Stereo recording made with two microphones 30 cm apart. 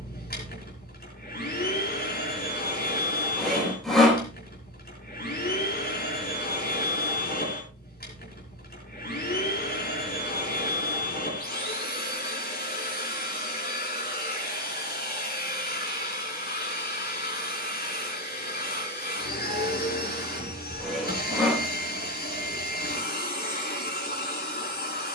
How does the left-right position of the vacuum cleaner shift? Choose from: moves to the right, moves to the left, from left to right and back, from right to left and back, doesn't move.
doesn't move.